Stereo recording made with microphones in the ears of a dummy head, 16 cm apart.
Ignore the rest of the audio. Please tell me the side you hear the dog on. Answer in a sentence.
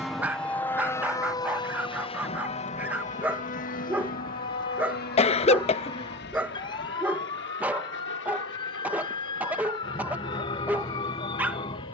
You can hear the dog in the centre.